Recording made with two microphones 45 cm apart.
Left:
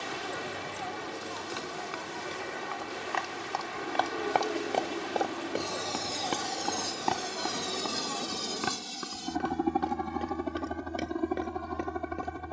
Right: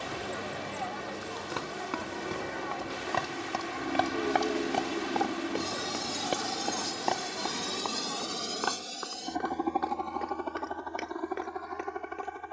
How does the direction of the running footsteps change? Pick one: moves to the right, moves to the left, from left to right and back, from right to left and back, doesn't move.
moves to the left.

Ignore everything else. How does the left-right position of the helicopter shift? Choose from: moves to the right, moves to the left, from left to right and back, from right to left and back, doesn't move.
moves to the left.